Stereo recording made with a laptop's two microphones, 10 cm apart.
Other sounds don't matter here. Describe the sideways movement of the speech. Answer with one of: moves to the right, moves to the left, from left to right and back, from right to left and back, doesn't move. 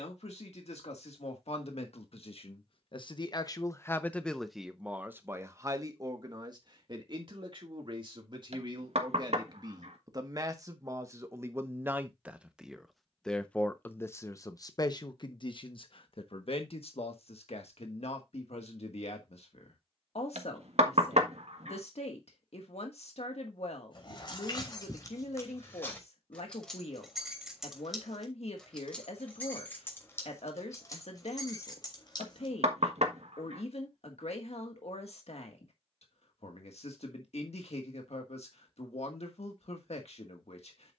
from left to right and back.